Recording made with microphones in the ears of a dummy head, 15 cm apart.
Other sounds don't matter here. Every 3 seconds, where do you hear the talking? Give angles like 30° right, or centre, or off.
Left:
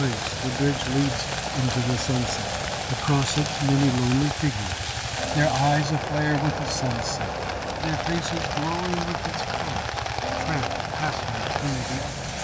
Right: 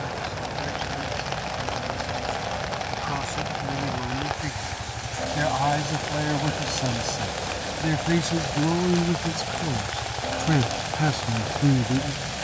60° left, 40° left, 10° right, 40° right.